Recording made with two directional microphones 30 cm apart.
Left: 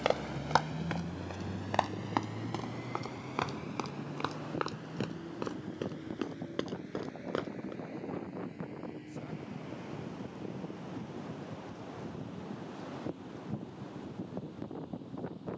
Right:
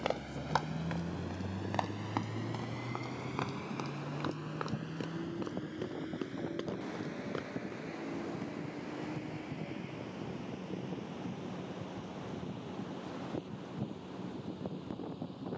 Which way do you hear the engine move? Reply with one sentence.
You can hear the engine travel towards the right.